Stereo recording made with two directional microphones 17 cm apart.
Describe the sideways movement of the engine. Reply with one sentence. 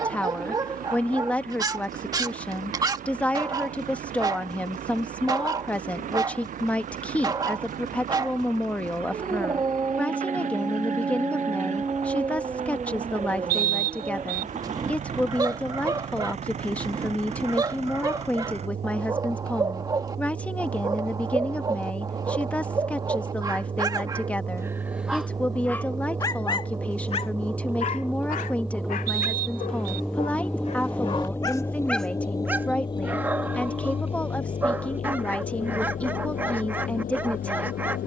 In this clip you hear the engine move to the left.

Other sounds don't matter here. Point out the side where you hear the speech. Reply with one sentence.
You can hear the speech in the centre.